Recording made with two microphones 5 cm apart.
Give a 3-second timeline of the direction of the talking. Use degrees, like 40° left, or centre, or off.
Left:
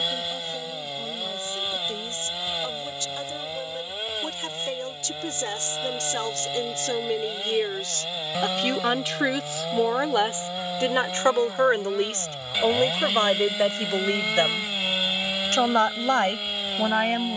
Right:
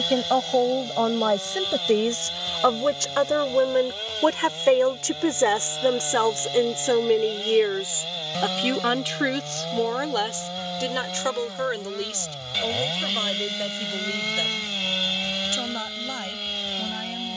70° right, 50° right, 20° right, 20° left, 40° left, 50° left.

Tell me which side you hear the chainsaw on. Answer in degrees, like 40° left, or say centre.
10° left.